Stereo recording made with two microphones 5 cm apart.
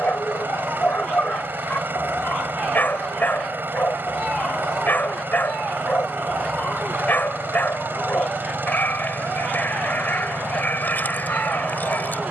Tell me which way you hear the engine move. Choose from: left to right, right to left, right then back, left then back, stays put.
stays put.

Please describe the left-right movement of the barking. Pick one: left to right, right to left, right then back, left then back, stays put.
stays put.